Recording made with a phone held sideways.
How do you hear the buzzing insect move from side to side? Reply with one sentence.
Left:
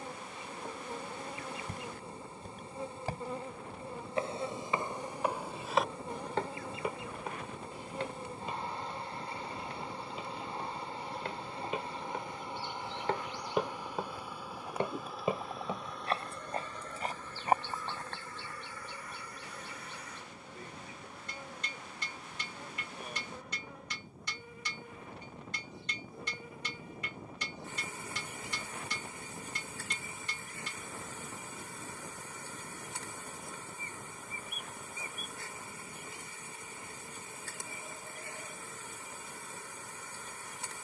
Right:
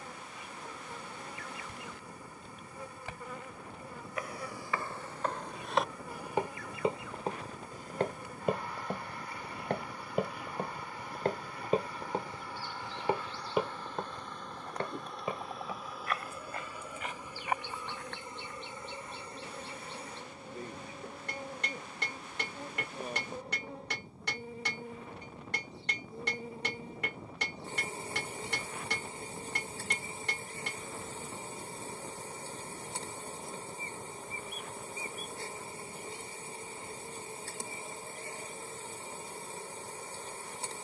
You can hear the buzzing insect travel towards the right.